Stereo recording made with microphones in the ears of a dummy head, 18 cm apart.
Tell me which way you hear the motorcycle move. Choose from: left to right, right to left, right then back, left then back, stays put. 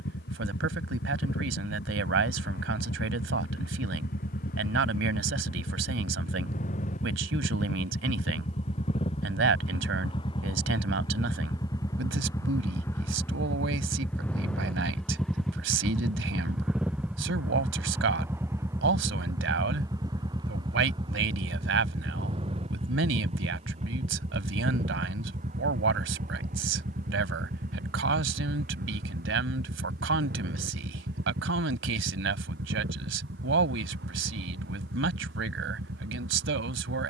left to right.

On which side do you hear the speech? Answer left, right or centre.
right.